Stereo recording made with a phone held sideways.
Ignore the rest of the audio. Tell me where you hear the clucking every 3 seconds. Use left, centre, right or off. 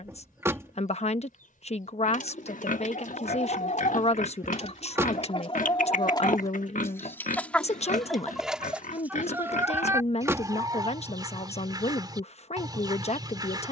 left, left, centre, right, right.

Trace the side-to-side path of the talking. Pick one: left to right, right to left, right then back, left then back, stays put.
stays put.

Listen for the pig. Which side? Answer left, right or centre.
left.